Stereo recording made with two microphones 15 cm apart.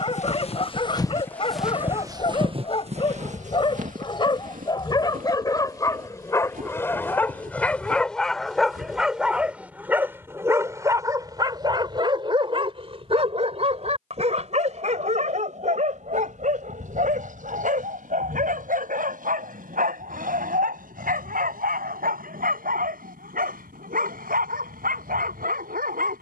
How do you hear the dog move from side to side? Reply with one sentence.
In this clip you hear the dog move from left to right.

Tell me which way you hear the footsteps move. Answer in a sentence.
In this clip you hear the footsteps travel towards the right.